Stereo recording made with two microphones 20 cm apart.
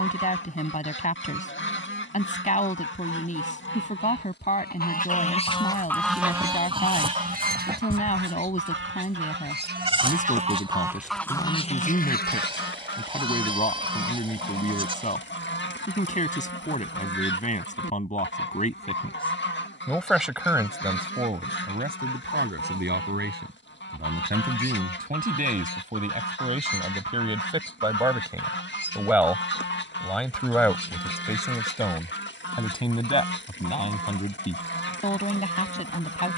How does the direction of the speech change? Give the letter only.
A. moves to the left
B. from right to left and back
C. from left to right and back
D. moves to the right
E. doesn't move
C.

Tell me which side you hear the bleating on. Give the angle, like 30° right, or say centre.
30° right.